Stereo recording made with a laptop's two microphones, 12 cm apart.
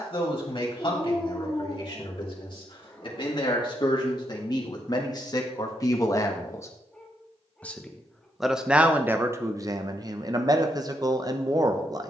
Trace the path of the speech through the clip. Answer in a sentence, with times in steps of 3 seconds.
You can hear the speech on the left from 0 s, in the centre from 6 s and on the right from 9 s.